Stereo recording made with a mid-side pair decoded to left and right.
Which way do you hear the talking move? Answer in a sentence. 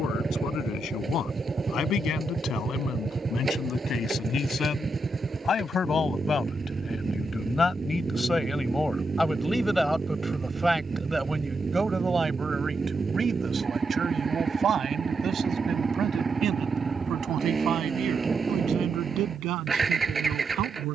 In this clip you hear the talking move from left to right.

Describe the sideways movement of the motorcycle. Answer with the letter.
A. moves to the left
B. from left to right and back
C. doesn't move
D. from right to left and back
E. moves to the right
C.